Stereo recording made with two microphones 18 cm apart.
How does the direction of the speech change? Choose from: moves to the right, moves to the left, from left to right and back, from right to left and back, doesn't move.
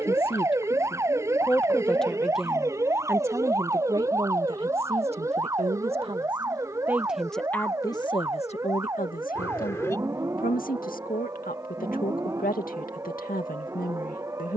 from left to right and back.